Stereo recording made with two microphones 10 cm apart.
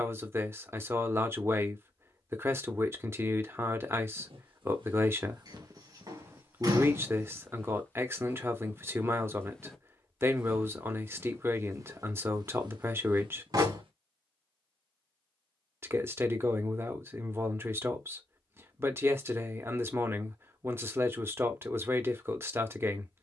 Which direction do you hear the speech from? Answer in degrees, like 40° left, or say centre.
20° right.